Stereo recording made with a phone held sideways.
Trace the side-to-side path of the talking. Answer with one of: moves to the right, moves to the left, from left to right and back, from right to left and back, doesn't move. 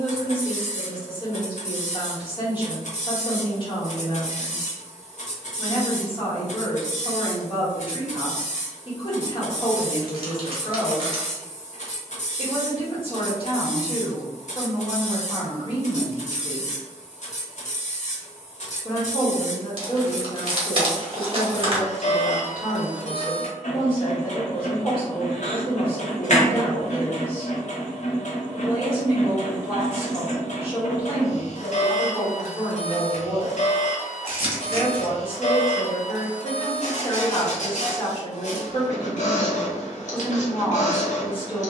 doesn't move.